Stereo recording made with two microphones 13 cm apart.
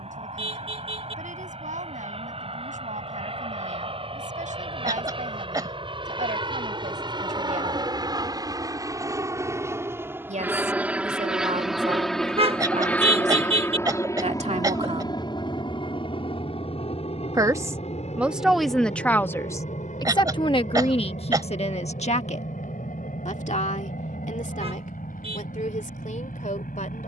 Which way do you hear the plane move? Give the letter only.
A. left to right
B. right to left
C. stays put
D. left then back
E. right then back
B.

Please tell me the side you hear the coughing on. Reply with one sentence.
You can hear the coughing on the right.